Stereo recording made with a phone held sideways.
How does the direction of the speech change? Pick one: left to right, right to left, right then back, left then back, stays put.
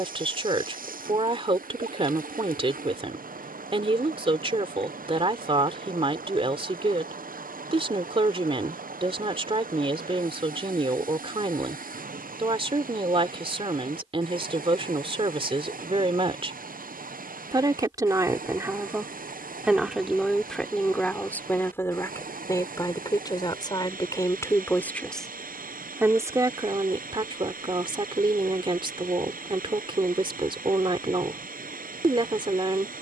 left then back.